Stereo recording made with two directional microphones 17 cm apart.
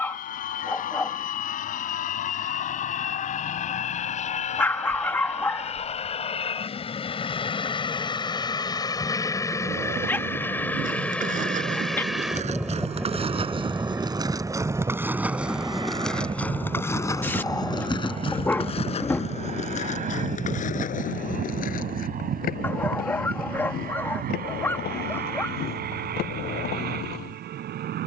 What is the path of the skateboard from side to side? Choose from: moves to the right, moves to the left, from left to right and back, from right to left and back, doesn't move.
moves to the left.